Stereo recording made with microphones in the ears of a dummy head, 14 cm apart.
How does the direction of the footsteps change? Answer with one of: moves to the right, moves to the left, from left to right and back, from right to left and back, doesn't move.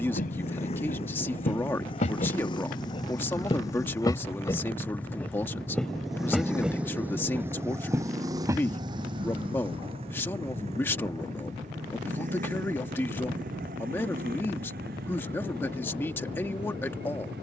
moves to the right.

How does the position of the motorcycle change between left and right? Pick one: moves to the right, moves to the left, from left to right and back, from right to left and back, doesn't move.
moves to the right.